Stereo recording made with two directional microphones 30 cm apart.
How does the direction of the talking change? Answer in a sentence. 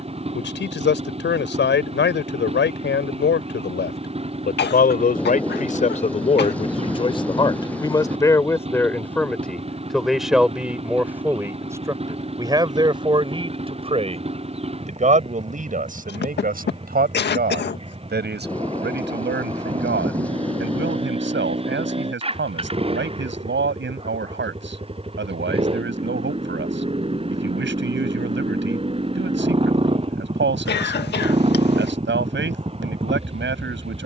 You can hear the talking move to the right.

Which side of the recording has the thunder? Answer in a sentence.
In this clip you hear the thunder in the centre.